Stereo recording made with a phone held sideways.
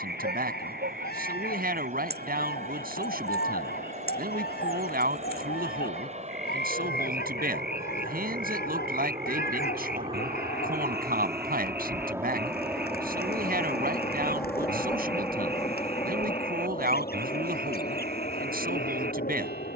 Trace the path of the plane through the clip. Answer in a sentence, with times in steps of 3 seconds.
In this clip you hear the plane on the right from 0 s, in the centre from 12 s and on the left from 15 s.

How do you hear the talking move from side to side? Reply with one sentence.
In this clip you hear the talking stay put.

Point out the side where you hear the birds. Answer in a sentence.
You can hear the birds on the left.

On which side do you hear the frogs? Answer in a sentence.
You can hear the frogs on the right.